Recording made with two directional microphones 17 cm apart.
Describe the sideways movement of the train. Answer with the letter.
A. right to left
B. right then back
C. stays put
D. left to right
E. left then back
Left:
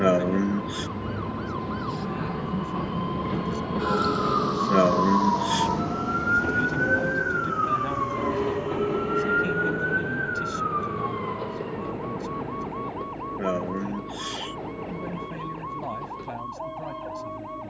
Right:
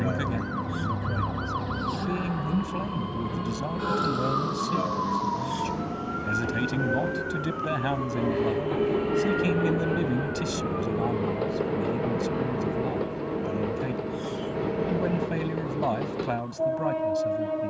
D.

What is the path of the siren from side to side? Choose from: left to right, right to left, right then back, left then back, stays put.
right to left.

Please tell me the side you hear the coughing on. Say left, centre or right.
left.